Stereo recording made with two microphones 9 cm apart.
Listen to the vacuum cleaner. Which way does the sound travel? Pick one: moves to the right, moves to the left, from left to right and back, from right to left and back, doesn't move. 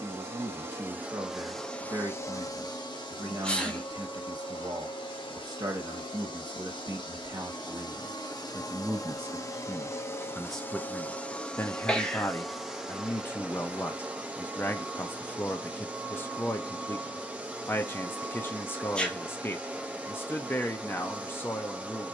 from right to left and back.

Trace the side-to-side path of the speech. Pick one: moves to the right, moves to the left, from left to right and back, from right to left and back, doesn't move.
moves to the left.